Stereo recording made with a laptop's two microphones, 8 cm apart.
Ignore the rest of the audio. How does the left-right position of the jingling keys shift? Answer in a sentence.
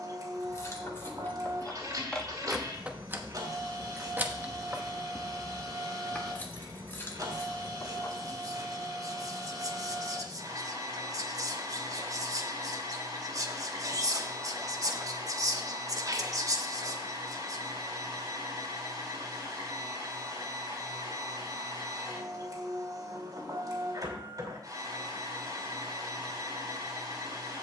In this clip you hear the jingling keys go right and come back.